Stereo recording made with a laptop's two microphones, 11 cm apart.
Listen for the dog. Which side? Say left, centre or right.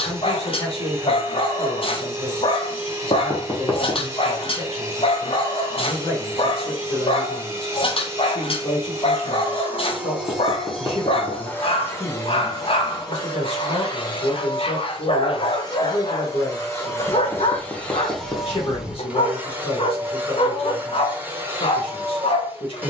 left.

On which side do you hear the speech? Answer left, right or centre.
left.